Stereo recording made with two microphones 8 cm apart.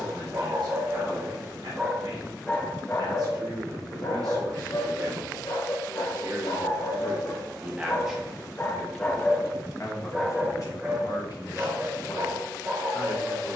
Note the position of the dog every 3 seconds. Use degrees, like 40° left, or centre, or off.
20° right, 60° left, 50° left, 10° right, 30° right.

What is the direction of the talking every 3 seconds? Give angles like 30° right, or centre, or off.
60° right, 50° right, 20° right, 50° left, 70° left.